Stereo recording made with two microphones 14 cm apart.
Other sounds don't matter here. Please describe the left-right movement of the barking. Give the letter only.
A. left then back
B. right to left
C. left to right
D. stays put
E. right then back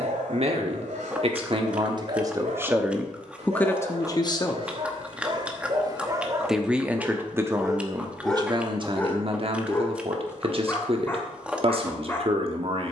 B.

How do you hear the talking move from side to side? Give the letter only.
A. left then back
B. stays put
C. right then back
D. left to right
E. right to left
A.